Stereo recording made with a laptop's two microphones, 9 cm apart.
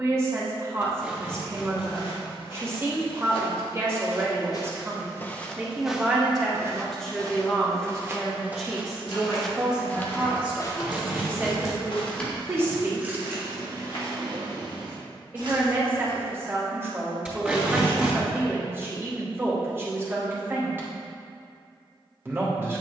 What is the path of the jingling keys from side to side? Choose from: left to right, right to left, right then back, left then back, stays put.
left to right.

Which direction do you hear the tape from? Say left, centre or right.
centre.